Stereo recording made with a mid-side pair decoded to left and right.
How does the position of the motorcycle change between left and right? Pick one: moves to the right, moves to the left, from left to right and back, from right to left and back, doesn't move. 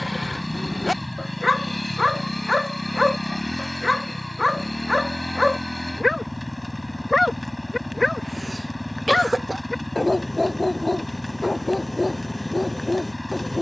doesn't move.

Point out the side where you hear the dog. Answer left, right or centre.
left.